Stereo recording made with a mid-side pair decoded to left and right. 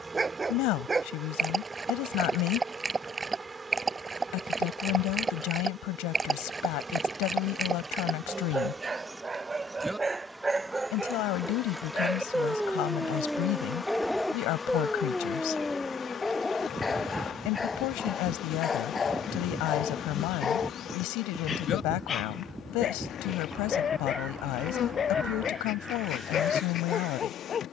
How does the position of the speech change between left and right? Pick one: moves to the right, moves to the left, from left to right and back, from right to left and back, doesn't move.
doesn't move.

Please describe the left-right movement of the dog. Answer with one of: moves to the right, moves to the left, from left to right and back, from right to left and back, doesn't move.
moves to the left.